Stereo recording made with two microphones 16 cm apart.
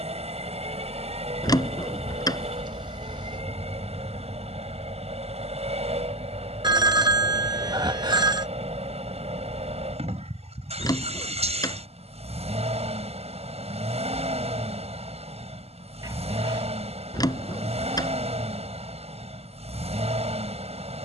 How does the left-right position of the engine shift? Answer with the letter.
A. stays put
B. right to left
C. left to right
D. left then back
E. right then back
A.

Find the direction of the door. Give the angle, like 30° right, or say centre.
20° left.